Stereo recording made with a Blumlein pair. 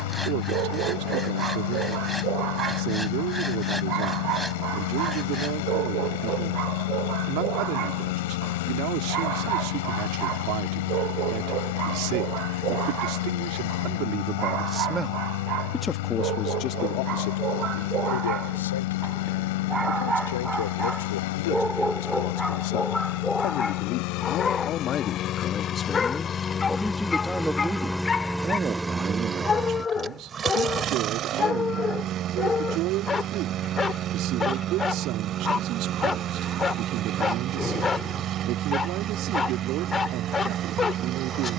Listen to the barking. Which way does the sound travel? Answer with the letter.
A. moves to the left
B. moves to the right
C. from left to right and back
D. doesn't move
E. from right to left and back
A.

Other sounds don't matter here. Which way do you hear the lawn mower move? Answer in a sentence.
You can hear the lawn mower move from left to right.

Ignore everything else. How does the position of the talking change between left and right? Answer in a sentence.
You can hear the talking move from right to left and back again.